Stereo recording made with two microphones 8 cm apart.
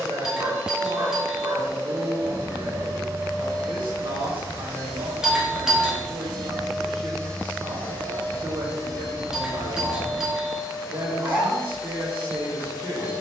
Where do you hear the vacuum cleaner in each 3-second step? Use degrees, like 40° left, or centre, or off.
30° right, 30° right, 20° left, 40° left, 40° left.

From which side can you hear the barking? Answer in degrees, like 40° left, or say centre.
30° right.